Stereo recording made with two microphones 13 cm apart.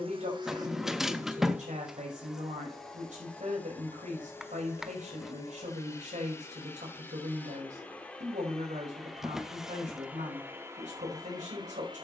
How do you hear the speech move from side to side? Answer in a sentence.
You can hear the speech stay put.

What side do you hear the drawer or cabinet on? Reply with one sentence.
In this clip you hear the drawer or cabinet in the centre.